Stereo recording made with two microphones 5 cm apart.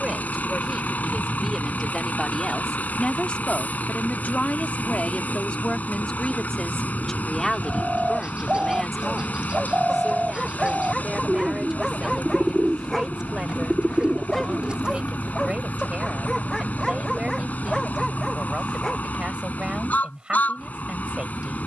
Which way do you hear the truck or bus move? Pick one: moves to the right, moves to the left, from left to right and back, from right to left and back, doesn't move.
doesn't move.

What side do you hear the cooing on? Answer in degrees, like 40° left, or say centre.
20° right.